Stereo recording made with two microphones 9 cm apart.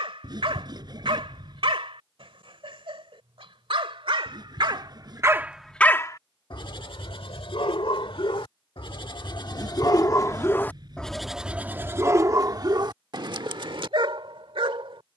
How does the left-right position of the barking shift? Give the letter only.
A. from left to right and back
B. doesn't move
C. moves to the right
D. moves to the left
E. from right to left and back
E.